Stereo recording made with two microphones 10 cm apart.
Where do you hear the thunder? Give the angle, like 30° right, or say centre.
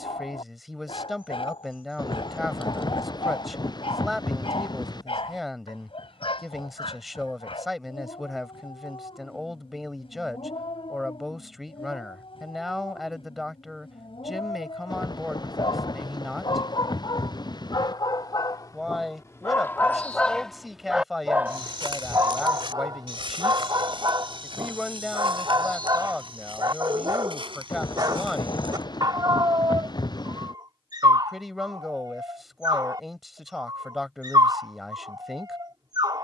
50° left.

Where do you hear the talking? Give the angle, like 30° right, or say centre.
centre.